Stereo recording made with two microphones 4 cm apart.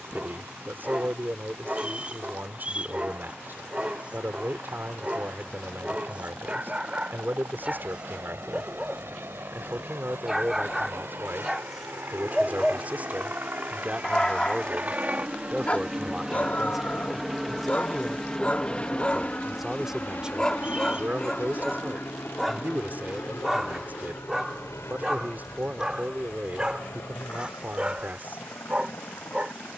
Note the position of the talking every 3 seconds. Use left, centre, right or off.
right, right, right, right, right, centre, centre, right, right, right.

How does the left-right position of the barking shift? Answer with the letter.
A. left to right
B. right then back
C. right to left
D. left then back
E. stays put
D.